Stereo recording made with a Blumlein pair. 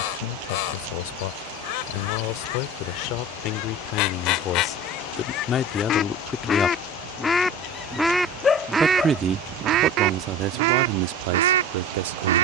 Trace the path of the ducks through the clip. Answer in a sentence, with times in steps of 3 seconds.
In this clip you hear the ducks on the left from 0 s, in the centre from 6 s and on the right from 9 s.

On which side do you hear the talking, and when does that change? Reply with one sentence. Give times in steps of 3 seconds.
In this clip you hear the talking on the left from 0 s, in the centre from 6 s and on the right from 9 s.